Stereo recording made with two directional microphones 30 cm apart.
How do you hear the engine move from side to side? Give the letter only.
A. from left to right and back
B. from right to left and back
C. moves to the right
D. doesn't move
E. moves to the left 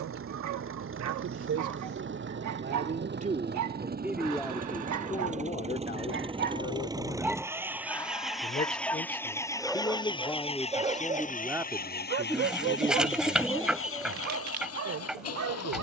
E.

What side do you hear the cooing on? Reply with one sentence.
In this clip you hear the cooing in the centre.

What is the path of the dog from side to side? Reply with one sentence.
You can hear the dog move from right to left and back again.